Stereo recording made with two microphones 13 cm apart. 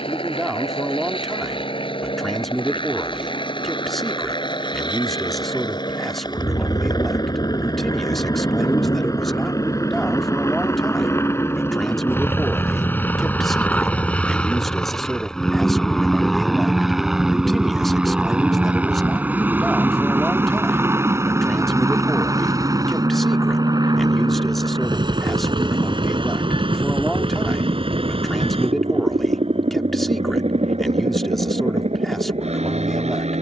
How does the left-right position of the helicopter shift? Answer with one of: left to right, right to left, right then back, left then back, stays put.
left to right.